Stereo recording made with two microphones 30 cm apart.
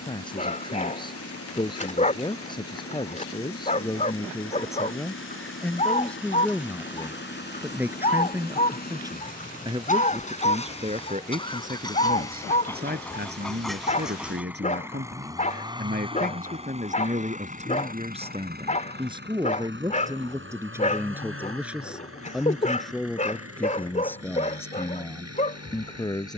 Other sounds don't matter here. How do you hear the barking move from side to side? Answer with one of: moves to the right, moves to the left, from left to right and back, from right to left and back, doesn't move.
doesn't move.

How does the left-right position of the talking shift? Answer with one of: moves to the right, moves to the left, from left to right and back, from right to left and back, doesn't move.
from left to right and back.